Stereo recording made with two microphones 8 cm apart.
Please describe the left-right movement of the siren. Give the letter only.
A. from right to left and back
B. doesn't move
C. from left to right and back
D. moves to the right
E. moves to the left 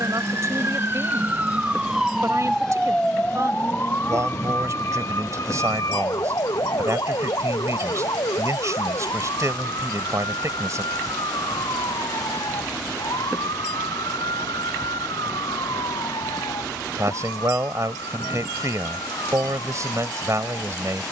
E.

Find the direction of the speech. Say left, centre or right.
right.